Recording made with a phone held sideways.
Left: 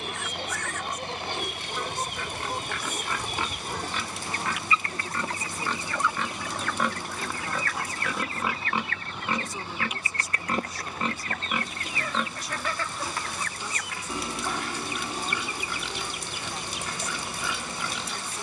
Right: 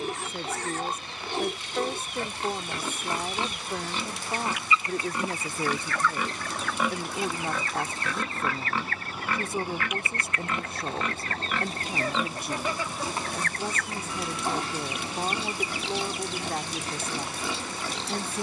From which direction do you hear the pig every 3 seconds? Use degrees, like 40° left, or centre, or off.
30° right, 20° right, centre, 30° left, 20° right, 30° right.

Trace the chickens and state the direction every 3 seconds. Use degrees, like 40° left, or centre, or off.
70° left, 40° left, 20° right, 50° right, 10° left, 60° left.